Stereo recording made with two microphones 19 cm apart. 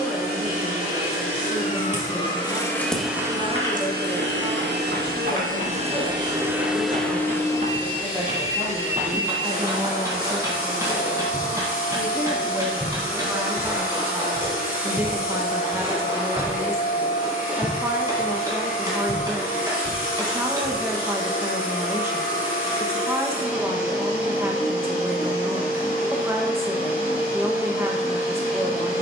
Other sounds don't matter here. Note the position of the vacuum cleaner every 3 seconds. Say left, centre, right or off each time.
left, right, centre, left, left, left, left, left, left, left.